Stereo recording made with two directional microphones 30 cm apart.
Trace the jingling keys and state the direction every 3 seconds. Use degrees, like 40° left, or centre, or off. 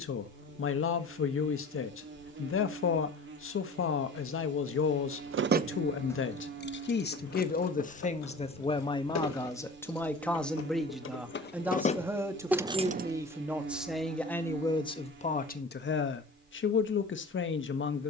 off, 40° right, 50° left, 40° left, 10° right, off.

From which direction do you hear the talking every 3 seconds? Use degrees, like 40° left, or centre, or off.
40° left, 40° left, 30° left, centre, centre, 40° left.